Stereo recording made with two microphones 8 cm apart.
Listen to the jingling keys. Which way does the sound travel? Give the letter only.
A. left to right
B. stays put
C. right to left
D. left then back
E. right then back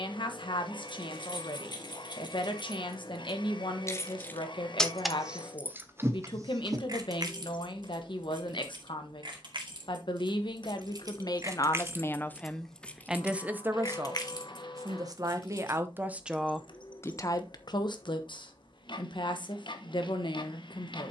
E.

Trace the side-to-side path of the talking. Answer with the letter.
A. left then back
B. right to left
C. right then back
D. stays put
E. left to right
C.